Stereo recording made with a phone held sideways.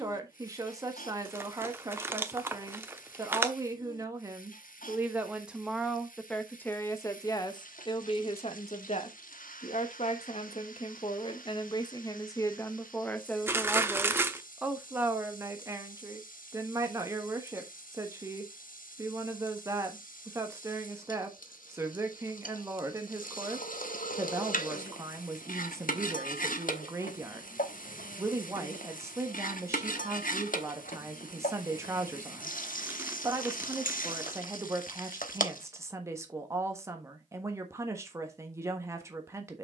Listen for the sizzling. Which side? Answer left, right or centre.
left.